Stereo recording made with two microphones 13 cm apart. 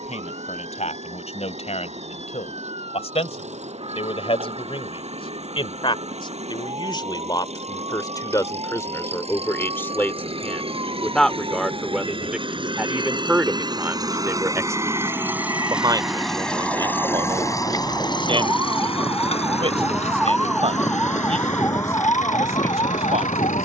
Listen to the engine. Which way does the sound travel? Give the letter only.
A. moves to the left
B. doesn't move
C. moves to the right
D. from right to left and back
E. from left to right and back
A.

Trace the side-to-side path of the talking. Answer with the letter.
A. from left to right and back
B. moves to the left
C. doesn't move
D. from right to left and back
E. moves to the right
E.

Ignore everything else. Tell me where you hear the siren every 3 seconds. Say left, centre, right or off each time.
right, right, right, right, right, right, centre, left.